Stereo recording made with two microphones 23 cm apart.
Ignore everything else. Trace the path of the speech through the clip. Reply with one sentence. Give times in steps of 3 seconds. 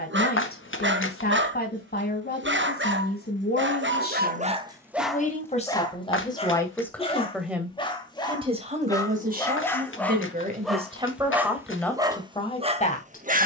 You can hear the speech on the left from 0 s, in the centre from 6 s, on the right from 9 s and on the left from 12 s.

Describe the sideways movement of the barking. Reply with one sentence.
You can hear the barking move from right to left and back again.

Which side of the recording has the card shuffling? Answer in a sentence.
You can hear the card shuffling on the left.